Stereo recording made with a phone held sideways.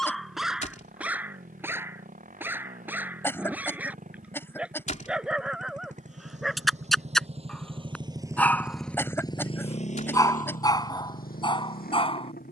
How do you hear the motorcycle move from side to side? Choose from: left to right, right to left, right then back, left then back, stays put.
right to left.